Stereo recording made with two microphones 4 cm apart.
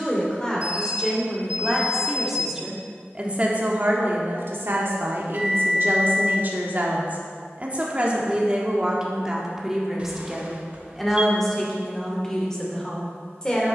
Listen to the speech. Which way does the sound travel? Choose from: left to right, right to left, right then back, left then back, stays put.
right then back.